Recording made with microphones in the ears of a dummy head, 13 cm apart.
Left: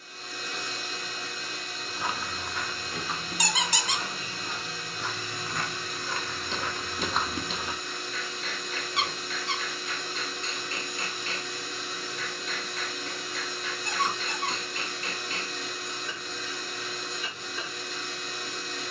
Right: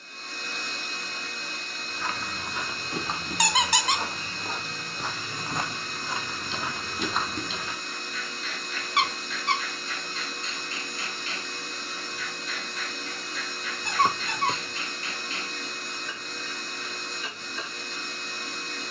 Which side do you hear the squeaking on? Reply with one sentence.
You can hear the squeaking on the right.